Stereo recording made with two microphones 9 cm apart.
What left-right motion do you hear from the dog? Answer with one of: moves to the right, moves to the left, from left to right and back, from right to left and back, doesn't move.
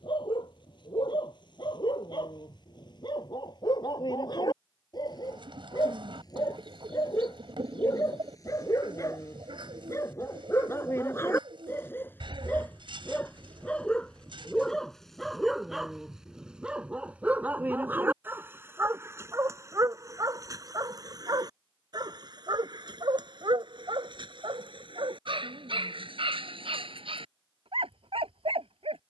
moves to the right.